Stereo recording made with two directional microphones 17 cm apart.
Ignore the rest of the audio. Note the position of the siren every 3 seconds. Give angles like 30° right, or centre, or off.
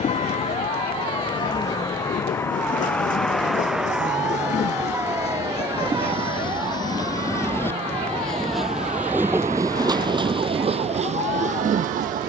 30° left, 10° right, 30° right, 40° right.